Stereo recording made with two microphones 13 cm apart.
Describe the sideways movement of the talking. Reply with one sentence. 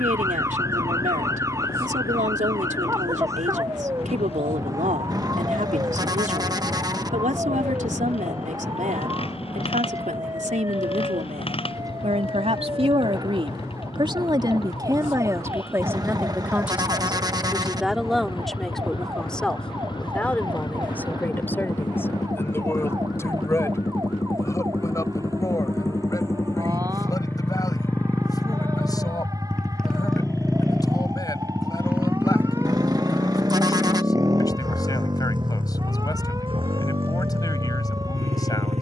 You can hear the talking move from right to left.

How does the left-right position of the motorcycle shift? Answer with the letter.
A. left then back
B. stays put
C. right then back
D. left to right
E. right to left
D.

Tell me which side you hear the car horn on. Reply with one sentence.
You can hear the car horn on the right.